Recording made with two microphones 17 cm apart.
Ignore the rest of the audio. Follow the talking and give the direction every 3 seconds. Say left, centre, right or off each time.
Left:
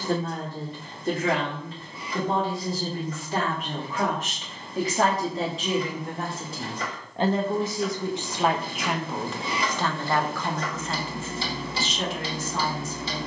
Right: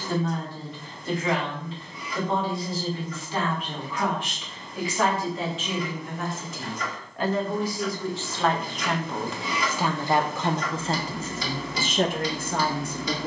left, left, left, right, right.